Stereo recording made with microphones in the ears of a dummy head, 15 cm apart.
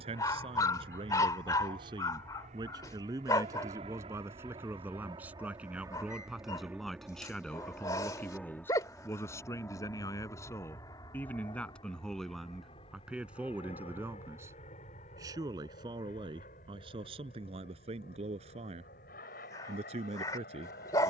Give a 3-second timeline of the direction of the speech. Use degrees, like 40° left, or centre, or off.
30° right, 10° right, centre, 10° left, 10° right, 30° right, 40° right.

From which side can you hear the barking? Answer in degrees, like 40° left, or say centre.
20° left.